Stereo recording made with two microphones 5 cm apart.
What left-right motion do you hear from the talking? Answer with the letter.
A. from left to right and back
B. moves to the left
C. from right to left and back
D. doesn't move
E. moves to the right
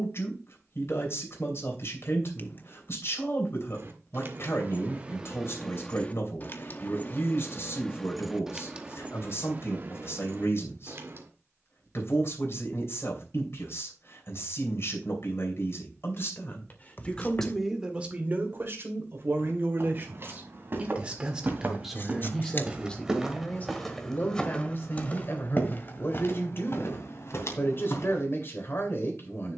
A.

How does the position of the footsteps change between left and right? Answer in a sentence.
You can hear the footsteps move to the left.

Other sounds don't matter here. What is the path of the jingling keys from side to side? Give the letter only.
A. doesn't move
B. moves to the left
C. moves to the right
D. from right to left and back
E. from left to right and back
D.